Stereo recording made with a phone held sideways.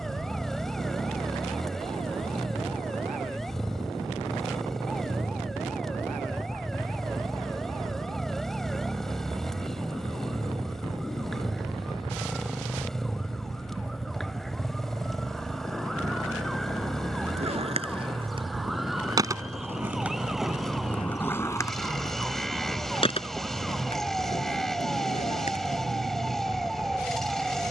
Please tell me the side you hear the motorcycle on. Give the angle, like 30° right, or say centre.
centre.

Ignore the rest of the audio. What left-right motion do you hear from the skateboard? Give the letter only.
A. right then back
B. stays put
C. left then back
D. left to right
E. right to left
E.